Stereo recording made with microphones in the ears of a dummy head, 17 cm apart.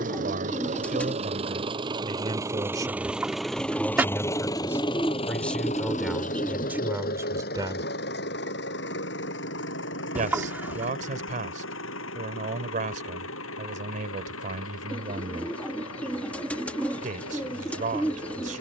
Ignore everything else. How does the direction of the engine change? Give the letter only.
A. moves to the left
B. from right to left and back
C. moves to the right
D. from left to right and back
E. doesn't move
A.